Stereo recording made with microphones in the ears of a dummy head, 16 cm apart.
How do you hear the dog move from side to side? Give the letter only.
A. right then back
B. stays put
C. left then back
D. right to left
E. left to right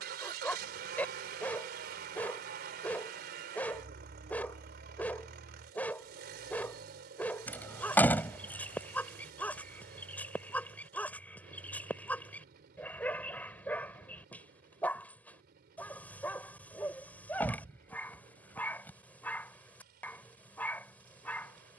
B.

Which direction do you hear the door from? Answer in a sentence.
In this clip you hear the door in the centre.